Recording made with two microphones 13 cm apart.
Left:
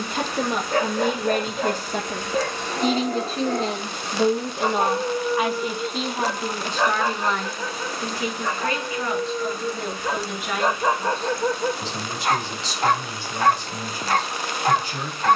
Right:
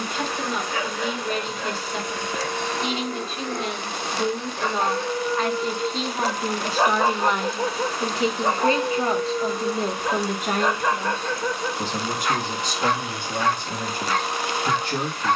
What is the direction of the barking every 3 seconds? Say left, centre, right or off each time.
left, left, right, centre, left.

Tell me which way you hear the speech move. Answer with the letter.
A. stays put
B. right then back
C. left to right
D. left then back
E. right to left
C.